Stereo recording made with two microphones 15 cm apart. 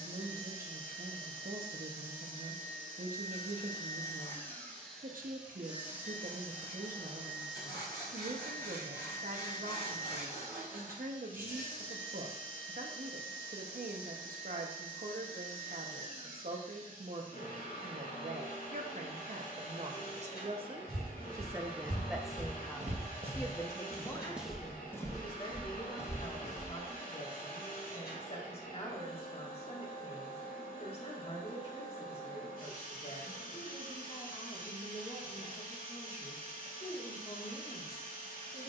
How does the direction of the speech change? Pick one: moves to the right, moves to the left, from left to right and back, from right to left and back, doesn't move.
moves to the left.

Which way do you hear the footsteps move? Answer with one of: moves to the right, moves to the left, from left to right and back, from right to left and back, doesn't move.
moves to the left.